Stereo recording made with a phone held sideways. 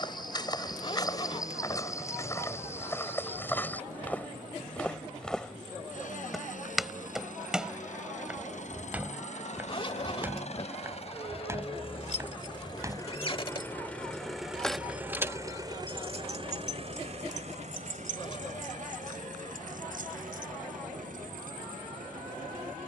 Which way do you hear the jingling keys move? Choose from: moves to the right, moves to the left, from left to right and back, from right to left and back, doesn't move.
moves to the right.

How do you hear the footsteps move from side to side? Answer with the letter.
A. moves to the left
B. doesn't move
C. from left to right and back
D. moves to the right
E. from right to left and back
D.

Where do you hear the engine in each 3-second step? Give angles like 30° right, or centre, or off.
70° left, 70° left, 60° left, 50° left, 20° left, 40° right, 70° right, 80° right.